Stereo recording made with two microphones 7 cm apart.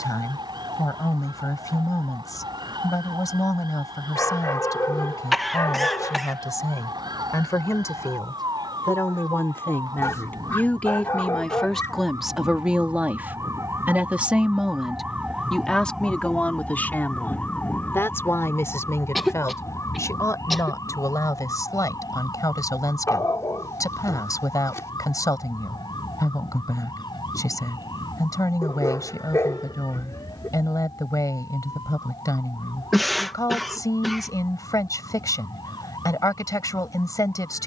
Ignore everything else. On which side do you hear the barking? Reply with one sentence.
You can hear the barking on the left.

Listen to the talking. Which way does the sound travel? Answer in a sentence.
In this clip you hear the talking move from left to right and back again.